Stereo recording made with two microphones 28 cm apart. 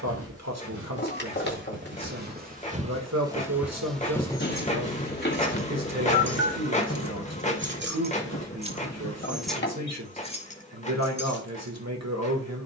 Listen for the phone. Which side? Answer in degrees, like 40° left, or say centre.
40° left.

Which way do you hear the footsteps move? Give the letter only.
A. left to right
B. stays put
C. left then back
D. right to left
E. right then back
D.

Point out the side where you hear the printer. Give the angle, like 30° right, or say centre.
20° left.